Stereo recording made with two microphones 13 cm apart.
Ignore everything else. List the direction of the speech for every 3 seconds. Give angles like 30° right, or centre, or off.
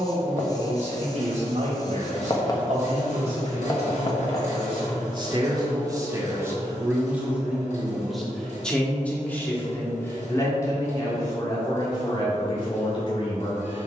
60° right, 40° right, 10° right, 20° left, 40° left.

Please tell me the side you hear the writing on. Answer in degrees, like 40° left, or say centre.
30° left.